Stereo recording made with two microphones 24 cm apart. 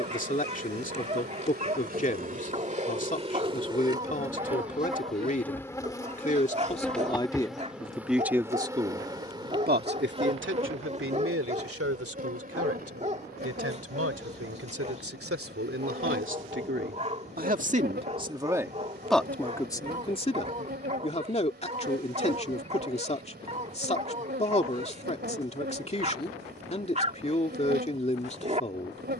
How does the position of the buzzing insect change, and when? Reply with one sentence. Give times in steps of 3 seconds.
In this clip you hear the buzzing insect on the right from 0 s, in the centre from 3 s and on the right from 9 s.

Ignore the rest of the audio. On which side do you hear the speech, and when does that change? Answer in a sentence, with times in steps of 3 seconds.
You can hear the speech on the left from 0 s, in the centre from 6 s, on the right from 9 s, in the centre from 18 s and on the left from 21 s.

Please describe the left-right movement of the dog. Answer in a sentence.
In this clip you hear the dog stay put.